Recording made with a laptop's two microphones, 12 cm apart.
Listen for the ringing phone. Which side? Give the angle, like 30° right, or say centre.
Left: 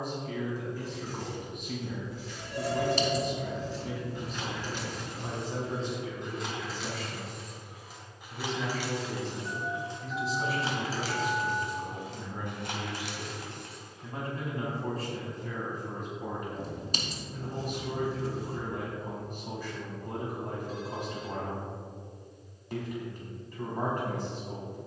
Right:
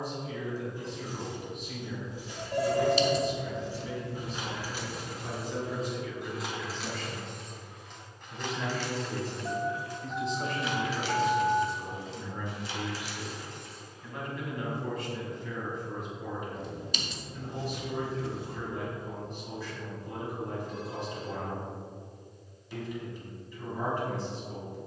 50° right.